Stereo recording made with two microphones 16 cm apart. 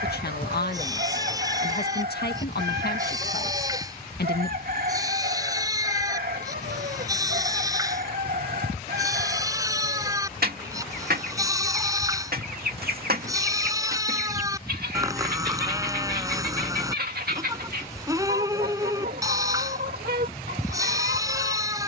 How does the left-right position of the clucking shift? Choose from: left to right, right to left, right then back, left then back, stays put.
stays put.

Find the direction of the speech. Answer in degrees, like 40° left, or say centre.
80° left.